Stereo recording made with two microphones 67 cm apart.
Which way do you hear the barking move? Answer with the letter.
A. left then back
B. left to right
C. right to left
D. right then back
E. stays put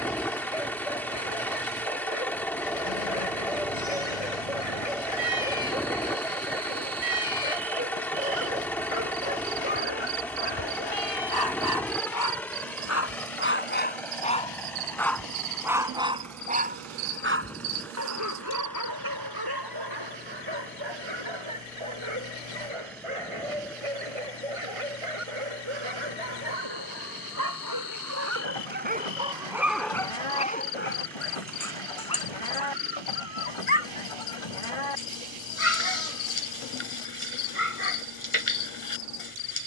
D.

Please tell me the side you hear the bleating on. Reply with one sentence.
In this clip you hear the bleating on the left.